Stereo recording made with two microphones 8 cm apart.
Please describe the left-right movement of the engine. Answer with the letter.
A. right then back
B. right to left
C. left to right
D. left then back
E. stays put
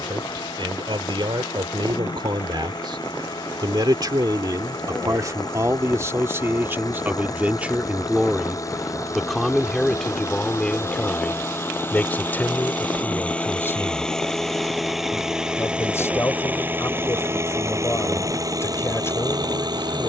C.